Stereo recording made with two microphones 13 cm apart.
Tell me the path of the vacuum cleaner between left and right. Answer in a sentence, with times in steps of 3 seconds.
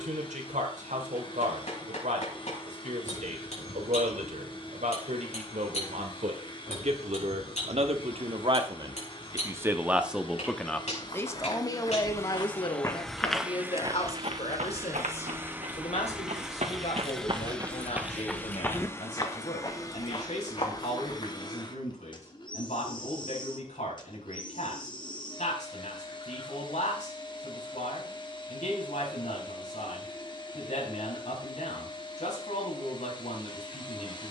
In this clip you hear the vacuum cleaner on the left from 0 s, in the centre from 12 s and on the left from 18 s.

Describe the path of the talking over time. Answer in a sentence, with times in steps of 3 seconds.
In this clip you hear the talking on the right from 0 s, in the centre from 9 s and on the left from 12 s.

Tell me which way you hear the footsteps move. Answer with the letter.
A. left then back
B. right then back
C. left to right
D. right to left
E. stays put
B.